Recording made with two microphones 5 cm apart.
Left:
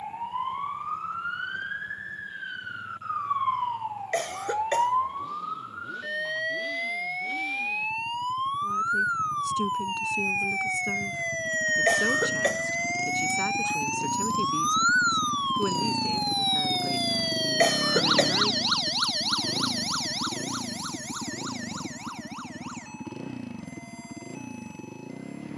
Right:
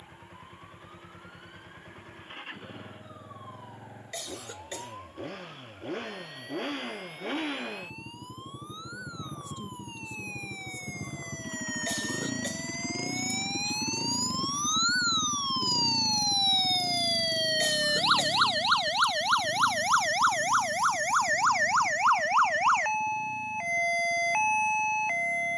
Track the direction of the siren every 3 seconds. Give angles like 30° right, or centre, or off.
70° left, 60° left, 60° left, 50° left, 40° left, 10° left, 30° right, 60° right, 70° right.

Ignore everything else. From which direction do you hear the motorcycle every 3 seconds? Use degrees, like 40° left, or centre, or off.
60° right, 60° right, 50° right, 40° right, 10° right, 20° left, 60° left, 70° left, 80° left.